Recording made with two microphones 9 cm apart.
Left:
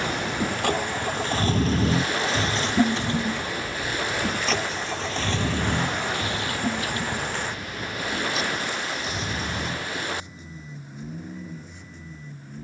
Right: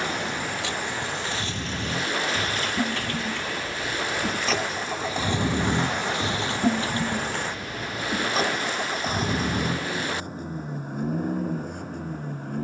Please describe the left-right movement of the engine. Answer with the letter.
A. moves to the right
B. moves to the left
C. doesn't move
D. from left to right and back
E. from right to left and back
A.